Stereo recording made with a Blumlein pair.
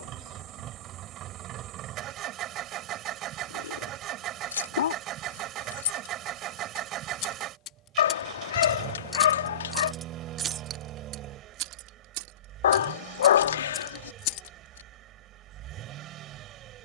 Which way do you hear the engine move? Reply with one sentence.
In this clip you hear the engine stay in one place.